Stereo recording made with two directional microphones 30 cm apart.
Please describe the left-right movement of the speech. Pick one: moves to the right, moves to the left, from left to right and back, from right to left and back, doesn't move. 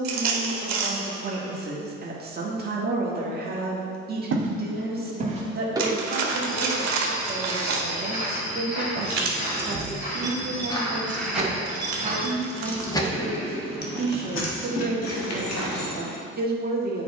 doesn't move.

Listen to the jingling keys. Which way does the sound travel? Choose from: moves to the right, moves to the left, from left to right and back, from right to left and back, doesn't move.
moves to the left.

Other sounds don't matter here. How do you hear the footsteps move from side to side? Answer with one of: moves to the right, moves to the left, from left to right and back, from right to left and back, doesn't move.
from right to left and back.